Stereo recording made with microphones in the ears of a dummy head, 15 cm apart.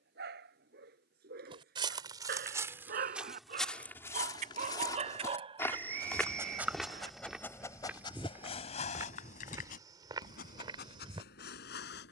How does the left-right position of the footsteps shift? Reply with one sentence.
You can hear the footsteps go left and come back.